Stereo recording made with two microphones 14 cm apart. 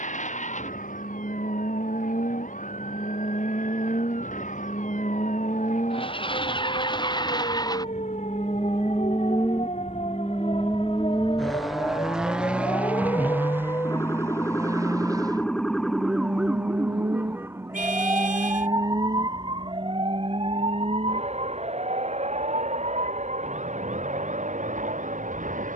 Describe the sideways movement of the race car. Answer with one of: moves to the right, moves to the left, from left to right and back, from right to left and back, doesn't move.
moves to the right.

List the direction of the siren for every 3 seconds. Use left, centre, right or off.
left, left, left, left, left, centre, right, right, right.